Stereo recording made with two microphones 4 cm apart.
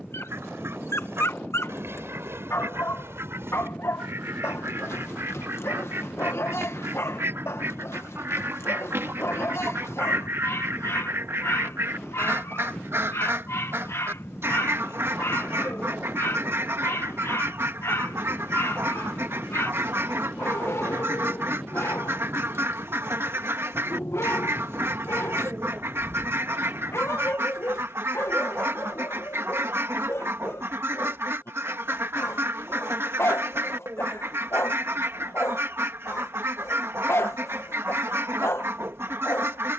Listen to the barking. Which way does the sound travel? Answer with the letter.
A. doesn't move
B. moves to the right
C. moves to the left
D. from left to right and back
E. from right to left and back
A.